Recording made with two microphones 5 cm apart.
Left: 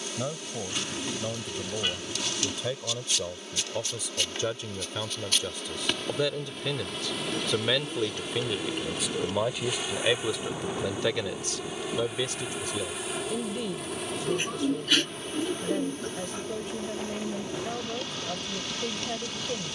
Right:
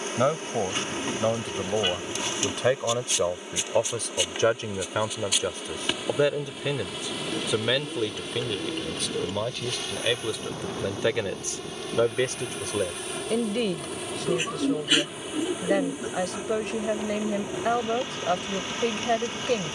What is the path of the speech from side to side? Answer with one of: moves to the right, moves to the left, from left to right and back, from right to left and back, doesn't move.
from right to left and back.